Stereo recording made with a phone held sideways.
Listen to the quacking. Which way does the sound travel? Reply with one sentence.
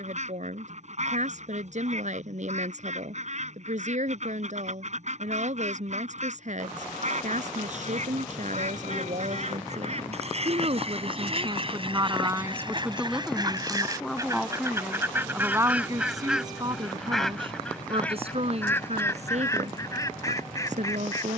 In this clip you hear the quacking move from right to left.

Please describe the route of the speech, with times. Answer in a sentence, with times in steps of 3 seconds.
You can hear the speech on the right from 0 s, in the centre from 12 s and on the right from 15 s.